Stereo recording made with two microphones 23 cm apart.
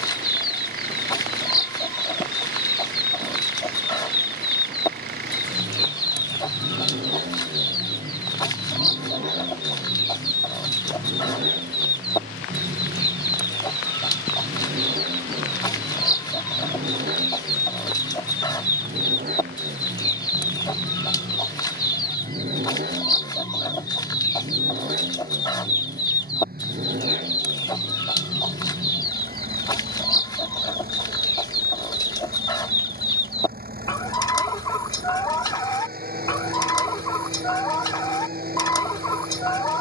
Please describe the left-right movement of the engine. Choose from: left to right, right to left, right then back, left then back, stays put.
stays put.